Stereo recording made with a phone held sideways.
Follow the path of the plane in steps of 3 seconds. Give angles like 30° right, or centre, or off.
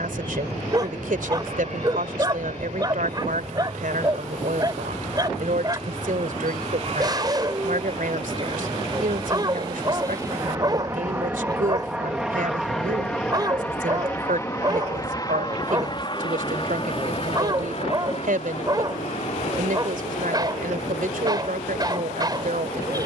70° right, 60° right, 50° right, 20° right, 10° left, 30° left, 50° left, 60° left.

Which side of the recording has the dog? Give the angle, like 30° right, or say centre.
30° right.